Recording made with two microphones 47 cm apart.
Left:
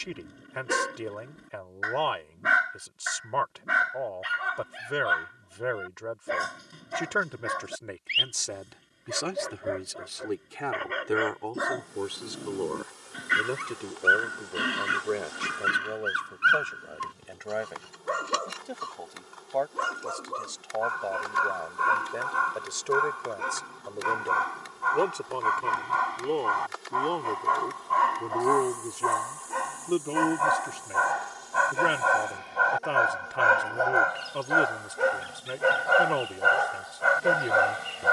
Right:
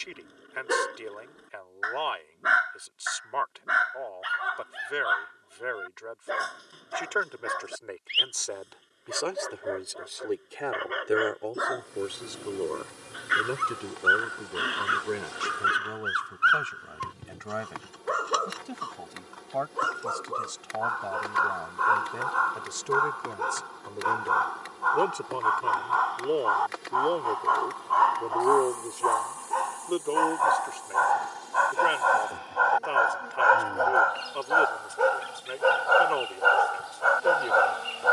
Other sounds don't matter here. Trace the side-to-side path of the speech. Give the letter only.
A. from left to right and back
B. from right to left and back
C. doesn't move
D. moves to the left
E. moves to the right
A.